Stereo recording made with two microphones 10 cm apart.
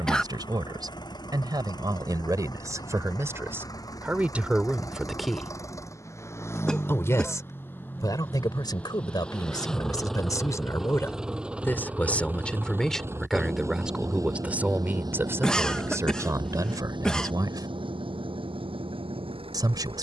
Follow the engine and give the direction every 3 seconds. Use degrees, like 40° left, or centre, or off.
40° left, 40° left, 20° left, centre, 30° right, 50° right, 60° right.